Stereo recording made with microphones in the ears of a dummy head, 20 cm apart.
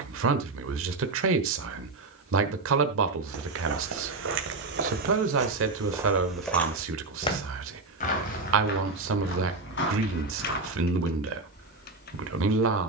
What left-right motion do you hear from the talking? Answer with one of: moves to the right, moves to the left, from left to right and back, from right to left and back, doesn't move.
doesn't move.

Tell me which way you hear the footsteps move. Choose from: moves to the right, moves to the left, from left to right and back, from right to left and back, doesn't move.
moves to the left.